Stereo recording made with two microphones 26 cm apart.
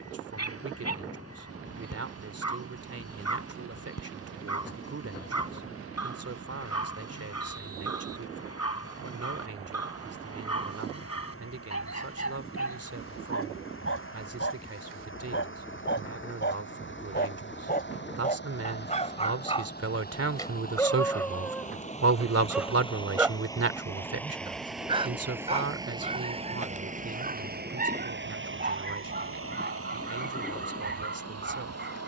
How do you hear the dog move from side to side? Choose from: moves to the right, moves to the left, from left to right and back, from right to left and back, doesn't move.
moves to the right.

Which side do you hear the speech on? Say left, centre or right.
right.